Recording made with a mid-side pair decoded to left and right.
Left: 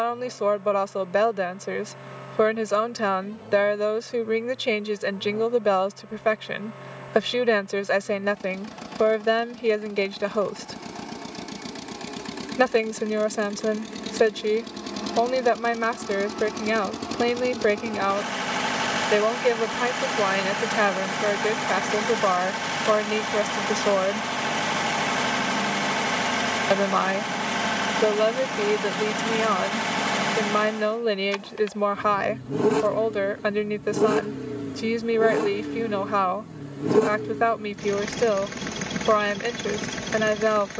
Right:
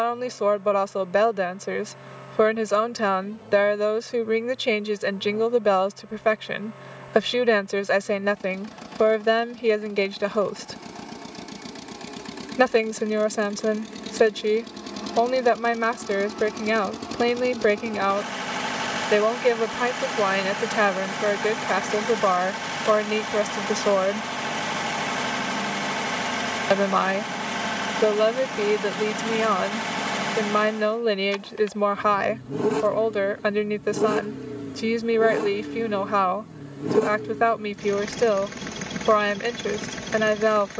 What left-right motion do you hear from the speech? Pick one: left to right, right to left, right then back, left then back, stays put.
stays put.